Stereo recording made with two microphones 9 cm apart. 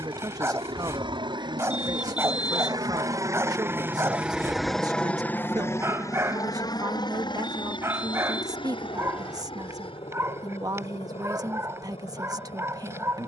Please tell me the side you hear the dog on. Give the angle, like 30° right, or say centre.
30° right.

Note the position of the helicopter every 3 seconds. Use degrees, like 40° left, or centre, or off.
60° right, centre, 50° left, 70° left, 70° left.